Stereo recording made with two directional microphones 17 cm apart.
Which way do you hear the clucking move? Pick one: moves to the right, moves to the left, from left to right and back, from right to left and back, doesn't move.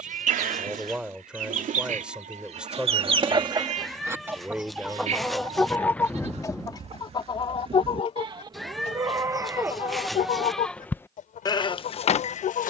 moves to the left.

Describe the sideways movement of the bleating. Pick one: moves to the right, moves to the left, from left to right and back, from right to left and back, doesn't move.
moves to the left.